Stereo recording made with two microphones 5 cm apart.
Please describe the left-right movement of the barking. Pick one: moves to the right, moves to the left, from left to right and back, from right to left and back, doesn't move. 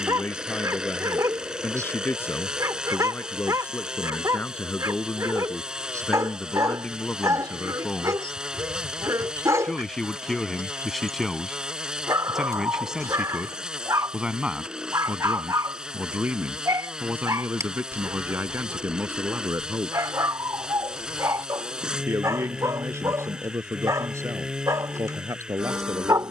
doesn't move.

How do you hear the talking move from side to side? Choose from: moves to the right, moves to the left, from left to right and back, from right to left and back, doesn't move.
moves to the right.